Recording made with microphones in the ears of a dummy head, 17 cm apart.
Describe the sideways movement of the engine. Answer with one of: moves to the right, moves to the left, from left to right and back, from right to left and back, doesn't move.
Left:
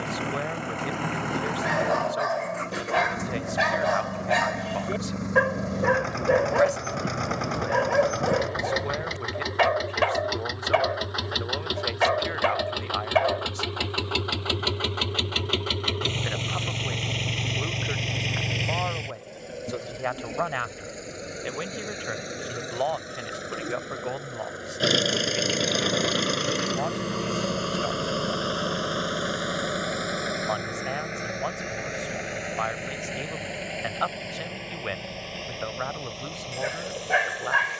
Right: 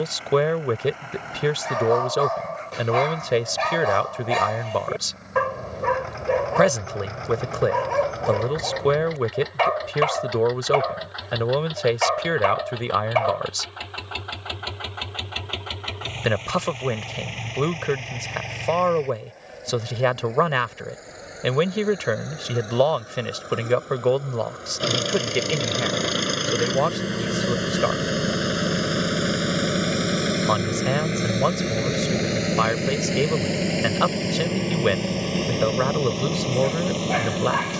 moves to the right.